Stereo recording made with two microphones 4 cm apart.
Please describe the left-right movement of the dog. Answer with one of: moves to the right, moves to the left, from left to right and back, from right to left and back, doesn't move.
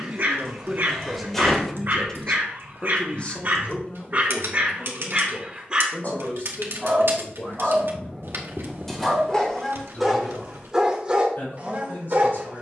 from right to left and back.